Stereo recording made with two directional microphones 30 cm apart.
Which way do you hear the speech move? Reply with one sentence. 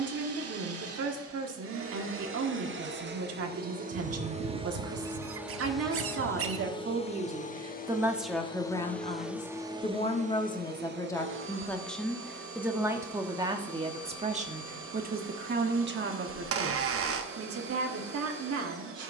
In this clip you hear the speech go left and come back.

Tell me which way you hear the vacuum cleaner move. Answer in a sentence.
In this clip you hear the vacuum cleaner move from right to left and back again.